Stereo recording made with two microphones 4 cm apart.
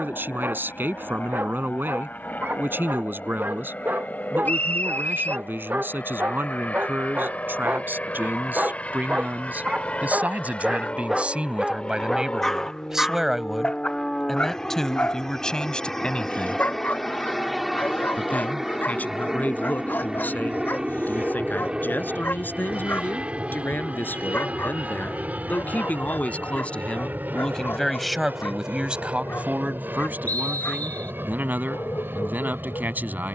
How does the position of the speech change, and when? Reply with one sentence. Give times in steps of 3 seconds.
You can hear the speech on the right from 0 s, in the centre from 12 s, on the left from 15 s, in the centre from 27 s and on the right from 30 s.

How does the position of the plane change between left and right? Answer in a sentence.
You can hear the plane go from the left side to the right.